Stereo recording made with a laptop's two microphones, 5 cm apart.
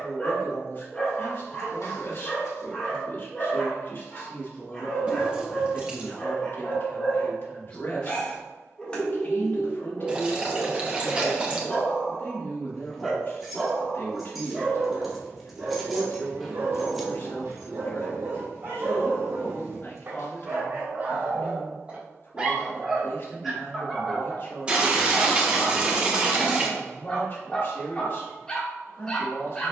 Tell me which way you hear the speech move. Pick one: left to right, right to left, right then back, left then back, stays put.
stays put.